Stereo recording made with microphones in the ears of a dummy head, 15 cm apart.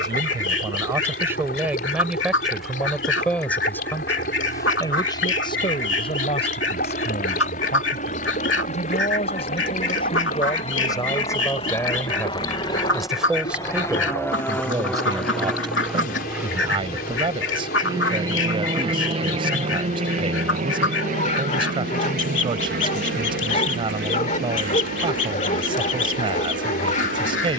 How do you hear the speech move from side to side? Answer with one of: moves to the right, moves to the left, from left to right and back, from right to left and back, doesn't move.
from right to left and back.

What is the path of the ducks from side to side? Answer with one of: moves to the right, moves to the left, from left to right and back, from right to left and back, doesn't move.
doesn't move.